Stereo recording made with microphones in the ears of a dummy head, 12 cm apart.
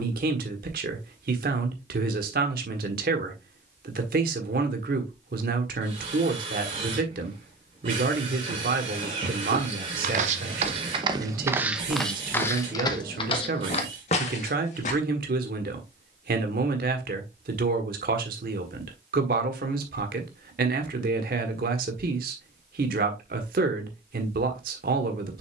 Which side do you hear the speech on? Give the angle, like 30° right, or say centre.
70° right.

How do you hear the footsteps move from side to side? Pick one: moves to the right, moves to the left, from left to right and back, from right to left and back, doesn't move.
moves to the left.